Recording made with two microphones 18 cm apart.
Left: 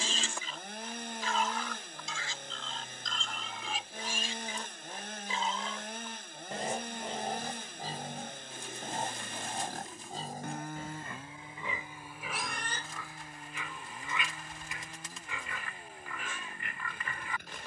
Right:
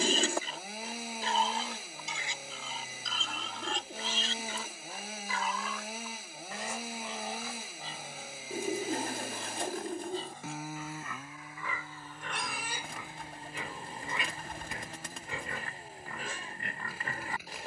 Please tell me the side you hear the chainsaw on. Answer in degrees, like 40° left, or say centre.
centre.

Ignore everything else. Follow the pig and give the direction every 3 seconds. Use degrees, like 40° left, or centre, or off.
30° right, 10° left, 40° left, 40° left, 20° right, 40° right.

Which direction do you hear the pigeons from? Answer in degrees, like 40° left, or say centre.
60° right.